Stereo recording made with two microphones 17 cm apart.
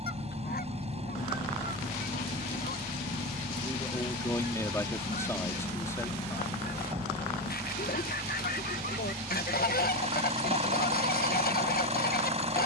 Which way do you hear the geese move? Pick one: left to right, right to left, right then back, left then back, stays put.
stays put.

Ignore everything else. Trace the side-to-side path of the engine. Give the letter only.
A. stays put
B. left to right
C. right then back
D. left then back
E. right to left
A.